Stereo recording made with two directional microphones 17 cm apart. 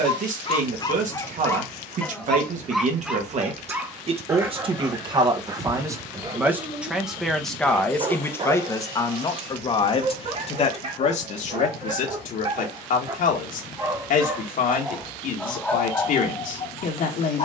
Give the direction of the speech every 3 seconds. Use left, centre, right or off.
right, right, centre, left, left, left.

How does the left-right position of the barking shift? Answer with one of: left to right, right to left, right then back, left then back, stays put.
right then back.